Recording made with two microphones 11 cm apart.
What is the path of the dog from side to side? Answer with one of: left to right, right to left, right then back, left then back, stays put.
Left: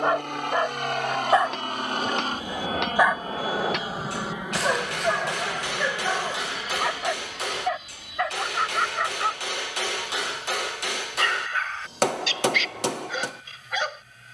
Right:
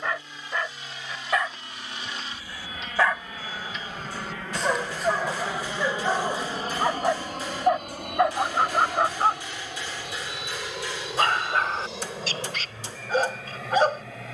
left to right.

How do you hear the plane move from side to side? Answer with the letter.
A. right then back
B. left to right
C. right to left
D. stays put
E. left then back
B.